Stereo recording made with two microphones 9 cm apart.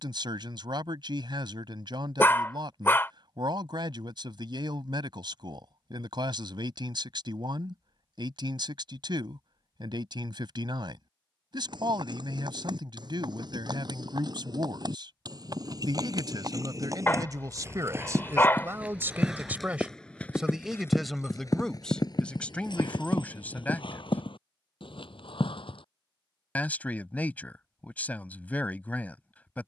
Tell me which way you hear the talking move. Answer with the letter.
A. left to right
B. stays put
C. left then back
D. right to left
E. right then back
D.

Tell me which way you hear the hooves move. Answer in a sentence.
In this clip you hear the hooves go from the right side to the left.